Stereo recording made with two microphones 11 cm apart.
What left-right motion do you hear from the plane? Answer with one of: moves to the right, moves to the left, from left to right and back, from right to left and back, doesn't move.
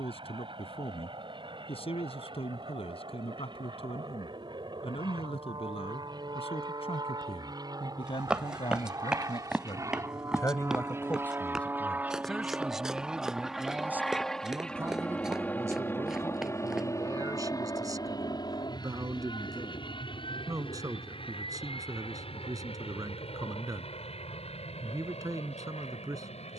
moves to the left.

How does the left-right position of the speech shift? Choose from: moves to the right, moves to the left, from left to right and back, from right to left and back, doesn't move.
moves to the right.